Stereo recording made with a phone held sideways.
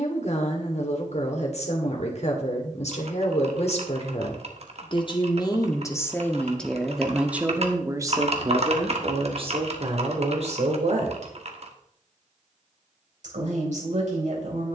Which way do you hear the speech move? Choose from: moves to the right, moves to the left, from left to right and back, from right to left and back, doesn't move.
moves to the right.